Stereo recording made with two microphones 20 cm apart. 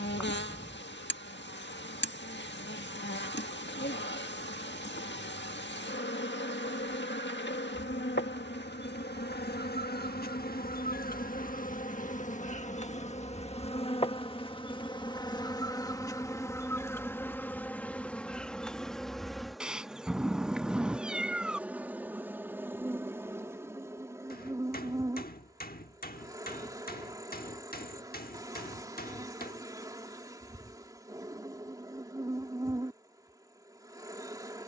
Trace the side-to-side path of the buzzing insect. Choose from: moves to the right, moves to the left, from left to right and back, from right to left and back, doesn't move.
moves to the right.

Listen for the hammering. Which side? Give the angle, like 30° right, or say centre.
50° left.